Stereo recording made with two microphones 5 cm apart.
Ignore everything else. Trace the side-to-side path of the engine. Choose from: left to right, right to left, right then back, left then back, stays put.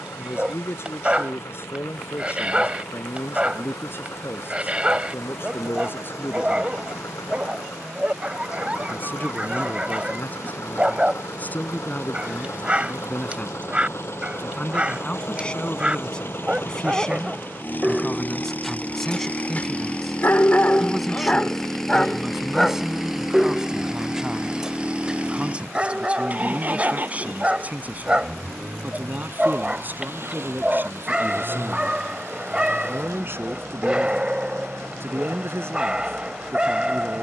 left to right.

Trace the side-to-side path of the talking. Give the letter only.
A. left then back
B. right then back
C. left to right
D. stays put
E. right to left
C.